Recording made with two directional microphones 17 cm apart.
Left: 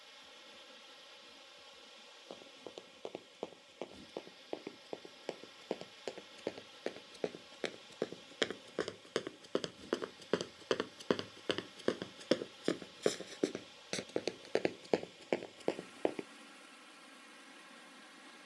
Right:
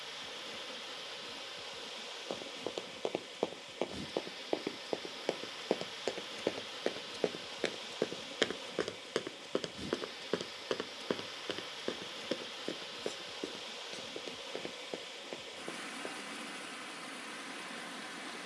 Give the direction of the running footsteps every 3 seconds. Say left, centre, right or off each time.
right, right, right, centre, left, left.